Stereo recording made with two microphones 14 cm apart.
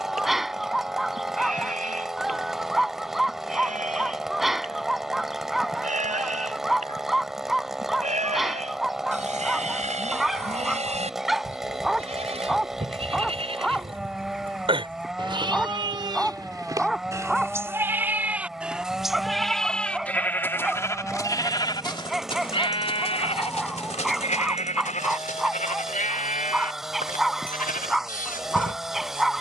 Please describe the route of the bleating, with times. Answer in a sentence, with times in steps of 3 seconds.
In this clip you hear the bleating on the right from 0 s, in the centre from 18 s and on the left from 21 s.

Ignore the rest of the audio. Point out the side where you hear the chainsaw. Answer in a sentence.
In this clip you hear the chainsaw in the centre.